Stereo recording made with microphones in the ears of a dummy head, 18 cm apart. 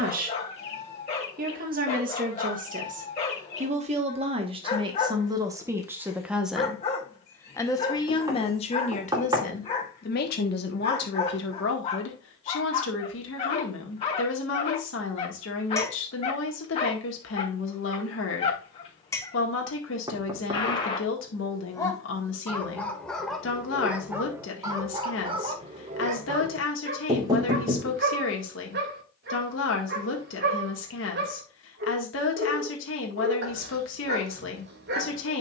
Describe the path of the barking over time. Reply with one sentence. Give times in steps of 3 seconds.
You can hear the barking on the left from 0 s, in the centre from 21 s and on the right from 24 s.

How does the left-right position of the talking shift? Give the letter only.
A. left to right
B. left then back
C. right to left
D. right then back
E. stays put
C.